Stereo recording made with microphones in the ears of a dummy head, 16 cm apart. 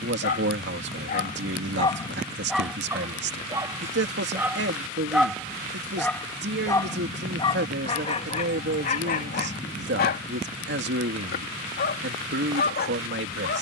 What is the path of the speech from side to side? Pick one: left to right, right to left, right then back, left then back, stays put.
stays put.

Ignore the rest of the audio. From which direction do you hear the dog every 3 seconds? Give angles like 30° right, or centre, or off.
30° left, 10° right, 30° left, 60° left, 60° left.